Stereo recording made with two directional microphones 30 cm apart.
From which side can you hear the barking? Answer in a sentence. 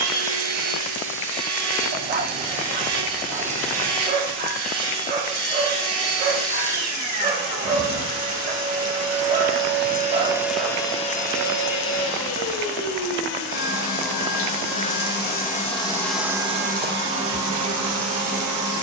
You can hear the barking on the right.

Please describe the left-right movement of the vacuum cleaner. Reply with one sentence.
You can hear the vacuum cleaner go left and come back.